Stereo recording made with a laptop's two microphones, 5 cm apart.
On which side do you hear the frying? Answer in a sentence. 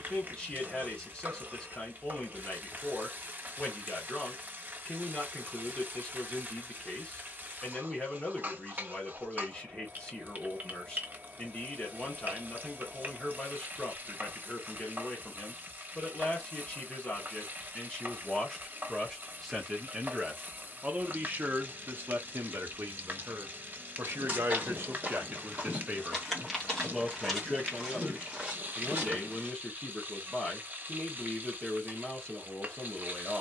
In this clip you hear the frying on the right.